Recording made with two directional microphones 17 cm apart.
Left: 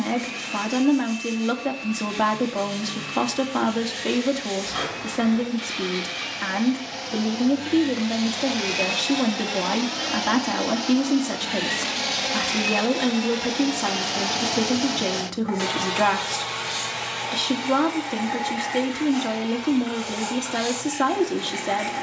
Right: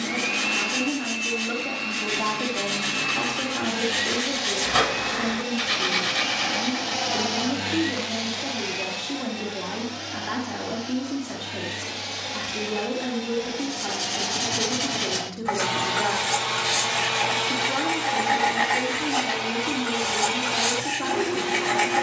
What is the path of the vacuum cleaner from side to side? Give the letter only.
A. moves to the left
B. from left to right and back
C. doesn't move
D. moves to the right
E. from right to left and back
E.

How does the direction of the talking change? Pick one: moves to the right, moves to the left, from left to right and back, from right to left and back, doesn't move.
doesn't move.